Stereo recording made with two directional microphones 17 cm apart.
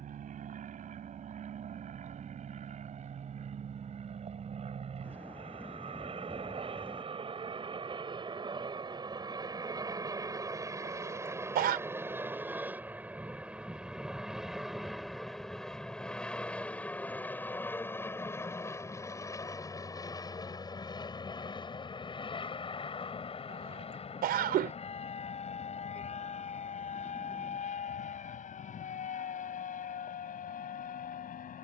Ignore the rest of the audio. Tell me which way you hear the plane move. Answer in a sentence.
In this clip you hear the plane travel towards the left.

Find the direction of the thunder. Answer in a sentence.
In this clip you hear the thunder in the centre.